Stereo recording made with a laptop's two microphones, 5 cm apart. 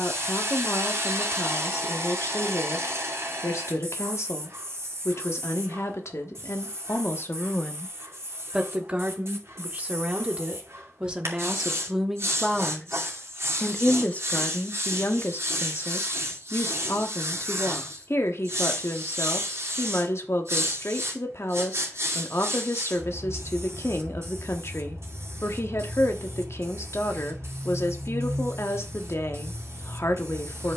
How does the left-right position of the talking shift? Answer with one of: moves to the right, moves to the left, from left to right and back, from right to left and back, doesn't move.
from left to right and back.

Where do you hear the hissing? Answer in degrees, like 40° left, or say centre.
60° right.